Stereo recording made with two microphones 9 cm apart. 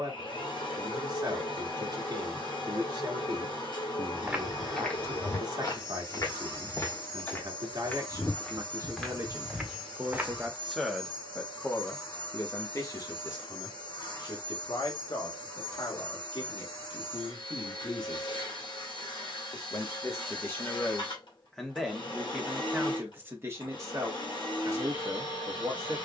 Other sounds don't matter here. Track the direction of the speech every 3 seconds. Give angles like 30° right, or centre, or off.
50° right, 50° right, 40° right, centre, 50° left, 60° left, 30° left, 10° right, 40° right.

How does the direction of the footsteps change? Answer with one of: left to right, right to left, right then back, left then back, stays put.
left then back.